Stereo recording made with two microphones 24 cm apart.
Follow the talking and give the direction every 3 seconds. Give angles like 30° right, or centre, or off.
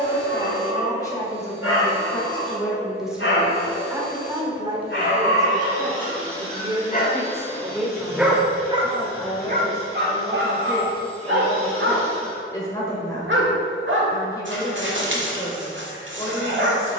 10° left, 20° right, 10° right, 20° left, 20° left, 20° left.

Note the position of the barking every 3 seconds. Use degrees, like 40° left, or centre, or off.
70° left, 60° left, 20° left, 50° right, 60° right, 60° right.